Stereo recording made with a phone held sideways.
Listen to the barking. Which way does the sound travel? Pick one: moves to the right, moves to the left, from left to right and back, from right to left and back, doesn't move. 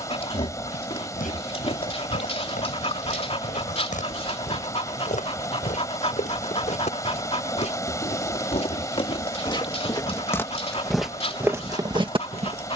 doesn't move.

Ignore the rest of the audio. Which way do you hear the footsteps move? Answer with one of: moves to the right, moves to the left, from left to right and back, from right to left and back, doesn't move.
moves to the right.